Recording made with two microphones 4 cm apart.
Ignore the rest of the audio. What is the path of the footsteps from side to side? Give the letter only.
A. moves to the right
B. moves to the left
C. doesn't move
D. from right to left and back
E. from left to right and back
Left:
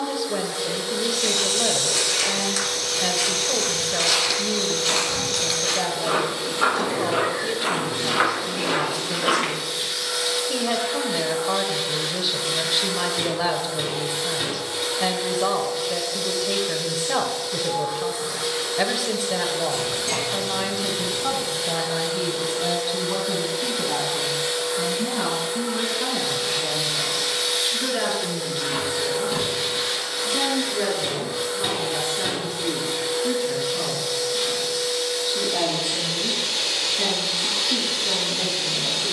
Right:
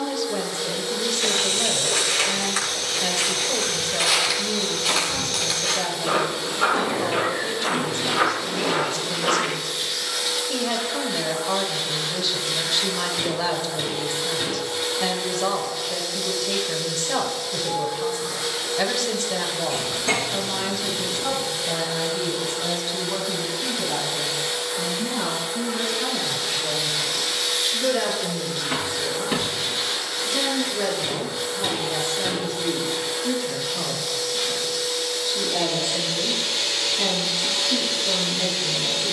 B.